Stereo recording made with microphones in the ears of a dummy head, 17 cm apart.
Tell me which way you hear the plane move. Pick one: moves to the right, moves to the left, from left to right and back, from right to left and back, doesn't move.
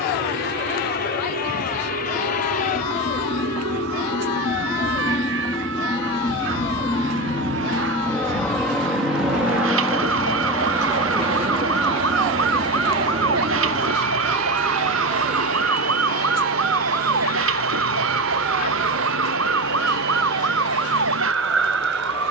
moves to the right.